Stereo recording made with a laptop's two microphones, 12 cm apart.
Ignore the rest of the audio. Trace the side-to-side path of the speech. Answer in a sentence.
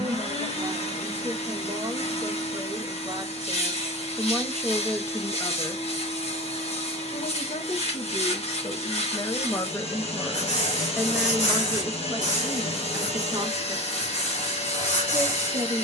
You can hear the speech move from right to left and back again.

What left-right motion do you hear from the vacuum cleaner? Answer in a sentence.
You can hear the vacuum cleaner stay put.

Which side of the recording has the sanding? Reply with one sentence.
In this clip you hear the sanding on the left.